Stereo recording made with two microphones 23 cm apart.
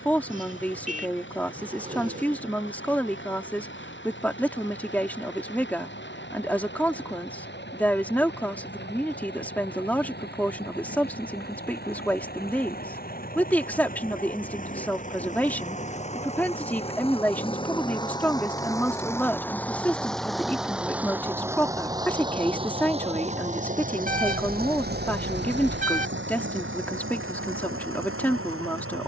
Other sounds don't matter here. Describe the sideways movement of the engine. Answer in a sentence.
You can hear the engine travel towards the right.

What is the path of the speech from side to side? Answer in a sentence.
In this clip you hear the speech stay in one place.